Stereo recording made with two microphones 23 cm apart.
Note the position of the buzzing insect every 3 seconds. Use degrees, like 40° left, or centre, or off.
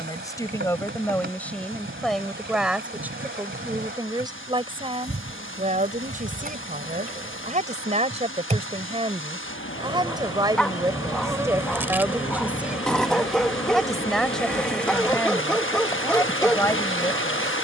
50° right, 40° right, 30° right, 20° right, centre, 20° left.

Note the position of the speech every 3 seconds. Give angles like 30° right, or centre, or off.
10° left, 20° right, 30° right, 20° right, centre, 10° left.